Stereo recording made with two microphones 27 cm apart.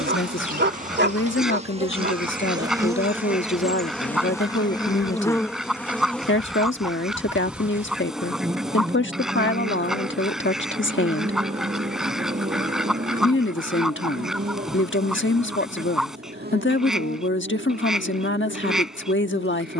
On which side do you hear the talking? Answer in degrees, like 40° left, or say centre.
50° left.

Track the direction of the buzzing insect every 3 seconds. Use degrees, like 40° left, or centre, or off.
30° right, 10° left, centre, 20° right, 30° right, 40° right, 40° right.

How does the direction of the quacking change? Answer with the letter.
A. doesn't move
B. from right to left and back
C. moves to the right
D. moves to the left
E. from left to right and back
A.